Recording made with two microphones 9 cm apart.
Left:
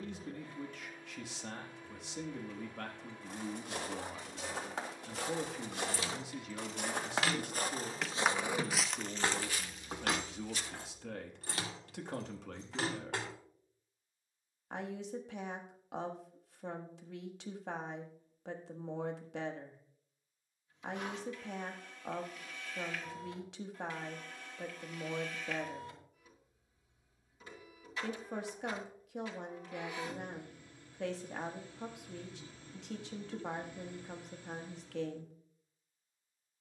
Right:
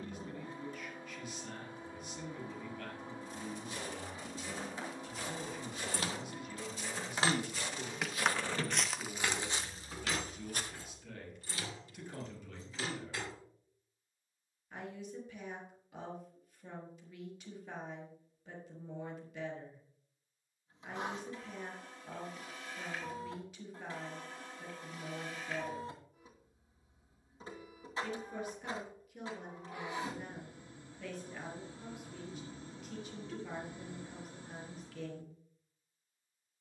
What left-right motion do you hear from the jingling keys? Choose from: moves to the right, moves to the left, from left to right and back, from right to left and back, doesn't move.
moves to the left.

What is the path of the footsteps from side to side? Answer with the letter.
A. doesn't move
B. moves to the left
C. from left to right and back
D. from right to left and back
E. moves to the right
E.